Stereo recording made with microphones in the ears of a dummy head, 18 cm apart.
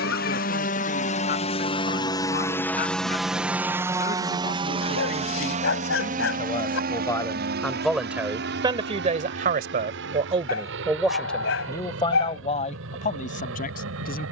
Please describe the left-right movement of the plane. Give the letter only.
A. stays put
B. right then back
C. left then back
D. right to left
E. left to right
E.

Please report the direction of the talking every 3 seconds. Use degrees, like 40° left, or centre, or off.
50° left, 40° left, 10° left, 20° right, 40° left.